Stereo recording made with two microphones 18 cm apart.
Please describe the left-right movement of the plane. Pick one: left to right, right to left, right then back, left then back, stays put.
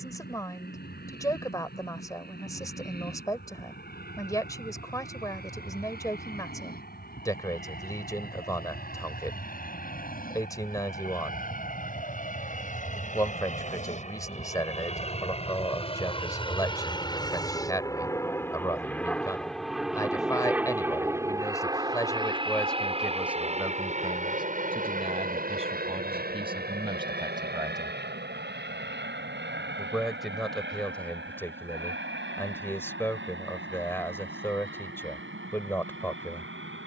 left to right.